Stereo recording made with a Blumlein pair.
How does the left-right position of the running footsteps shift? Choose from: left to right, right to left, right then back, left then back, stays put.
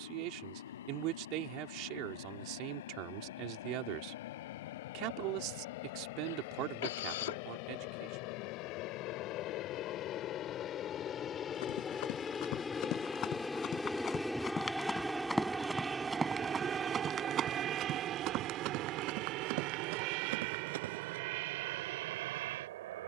left to right.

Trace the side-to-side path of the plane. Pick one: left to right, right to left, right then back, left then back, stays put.
left to right.